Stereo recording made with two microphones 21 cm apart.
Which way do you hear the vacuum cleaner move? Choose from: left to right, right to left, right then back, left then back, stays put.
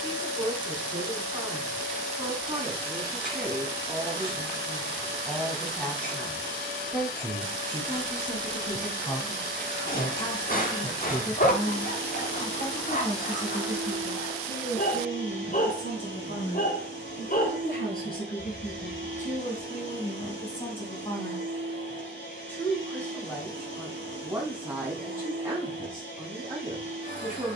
stays put.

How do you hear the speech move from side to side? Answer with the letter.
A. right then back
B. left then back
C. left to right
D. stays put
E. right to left
B.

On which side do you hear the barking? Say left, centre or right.
left.